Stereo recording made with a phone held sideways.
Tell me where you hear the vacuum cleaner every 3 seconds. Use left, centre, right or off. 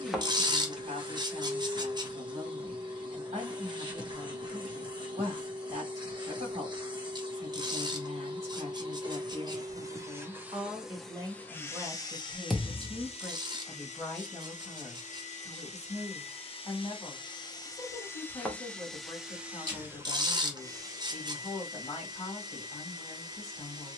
right, right, right, centre, left, left, centre, right.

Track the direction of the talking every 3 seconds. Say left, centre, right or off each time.
right, right, right, right, centre, left, left, left.